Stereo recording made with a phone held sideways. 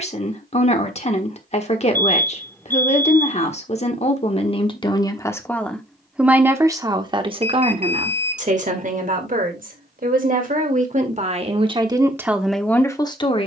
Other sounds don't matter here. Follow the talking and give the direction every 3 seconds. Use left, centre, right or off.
left, left, right, right, centre.